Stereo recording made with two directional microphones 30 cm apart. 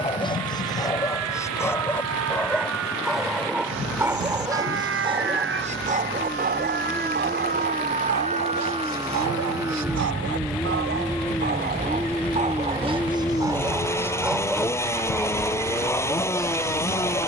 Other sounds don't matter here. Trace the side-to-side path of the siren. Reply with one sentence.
You can hear the siren move from right to left.